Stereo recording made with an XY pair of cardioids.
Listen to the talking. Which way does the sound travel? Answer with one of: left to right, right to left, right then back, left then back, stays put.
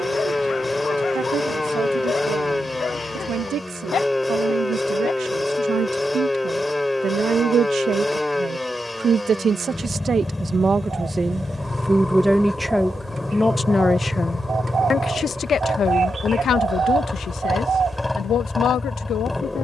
right to left.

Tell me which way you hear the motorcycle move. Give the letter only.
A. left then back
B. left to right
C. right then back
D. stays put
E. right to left
D.